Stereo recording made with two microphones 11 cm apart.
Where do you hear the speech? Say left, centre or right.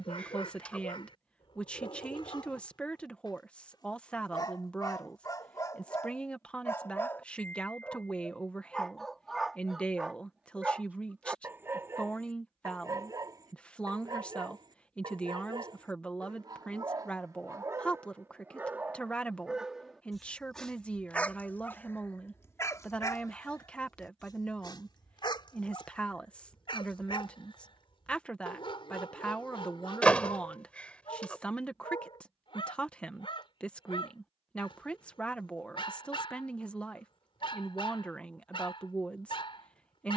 centre.